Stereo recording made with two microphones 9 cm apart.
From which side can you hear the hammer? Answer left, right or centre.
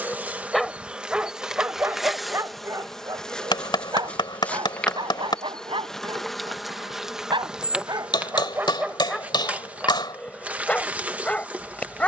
left.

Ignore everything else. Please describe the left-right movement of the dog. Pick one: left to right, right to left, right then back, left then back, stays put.
right then back.